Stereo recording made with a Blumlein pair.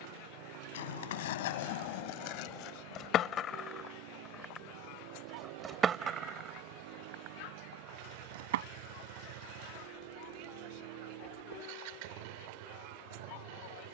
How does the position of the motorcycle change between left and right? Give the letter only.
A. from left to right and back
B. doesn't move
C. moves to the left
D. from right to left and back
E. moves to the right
B.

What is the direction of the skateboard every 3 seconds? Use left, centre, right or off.
left, centre, right, off, off.